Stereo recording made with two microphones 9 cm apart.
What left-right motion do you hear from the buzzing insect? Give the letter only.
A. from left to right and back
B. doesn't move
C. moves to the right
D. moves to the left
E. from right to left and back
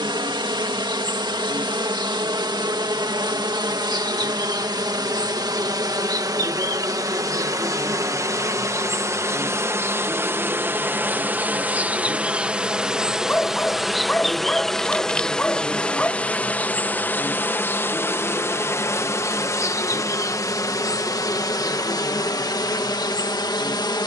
D.